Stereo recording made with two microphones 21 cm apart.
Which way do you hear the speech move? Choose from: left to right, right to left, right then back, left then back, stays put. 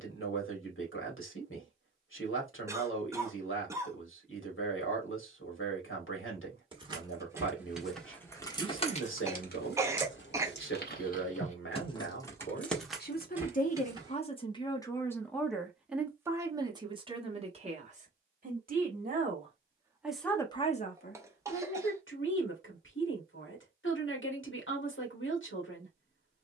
right then back.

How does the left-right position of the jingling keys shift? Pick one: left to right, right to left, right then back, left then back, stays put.
left then back.